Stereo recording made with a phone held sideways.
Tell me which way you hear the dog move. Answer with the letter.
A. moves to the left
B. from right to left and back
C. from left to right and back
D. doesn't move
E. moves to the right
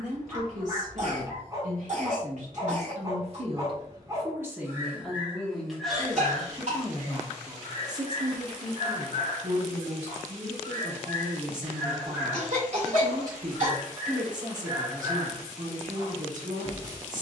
B.